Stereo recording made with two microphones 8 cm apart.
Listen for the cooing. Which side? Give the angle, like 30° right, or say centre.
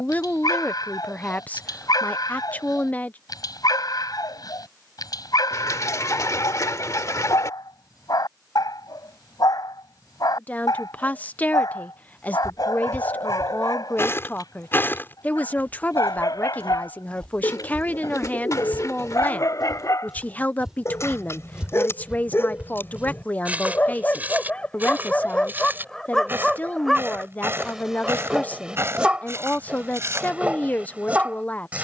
40° left.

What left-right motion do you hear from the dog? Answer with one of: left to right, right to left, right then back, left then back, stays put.
left to right.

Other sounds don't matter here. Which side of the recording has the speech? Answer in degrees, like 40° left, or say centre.
20° left.